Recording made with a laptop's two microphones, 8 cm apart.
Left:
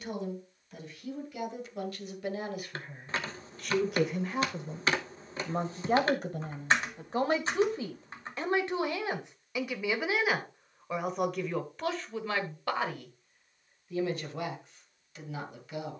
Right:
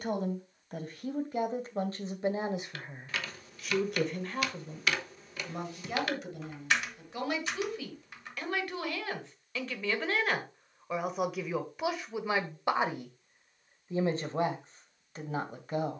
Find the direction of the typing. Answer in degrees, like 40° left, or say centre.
30° left.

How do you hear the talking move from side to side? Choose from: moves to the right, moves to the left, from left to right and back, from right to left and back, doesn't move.
from right to left and back.